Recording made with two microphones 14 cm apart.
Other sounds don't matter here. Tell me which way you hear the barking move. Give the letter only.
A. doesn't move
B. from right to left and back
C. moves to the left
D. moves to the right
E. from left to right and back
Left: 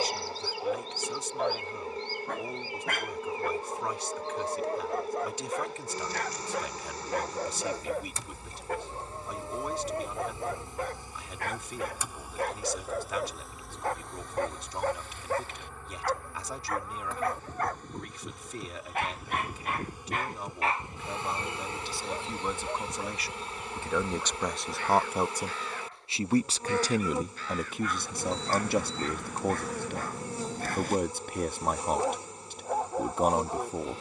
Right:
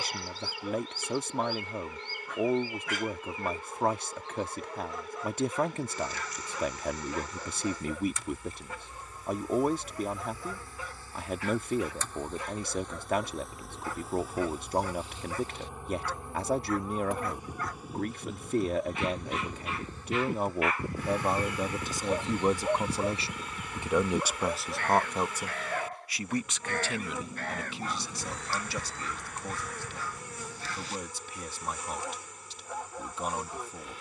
E.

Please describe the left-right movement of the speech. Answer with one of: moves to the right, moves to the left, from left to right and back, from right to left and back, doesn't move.
moves to the left.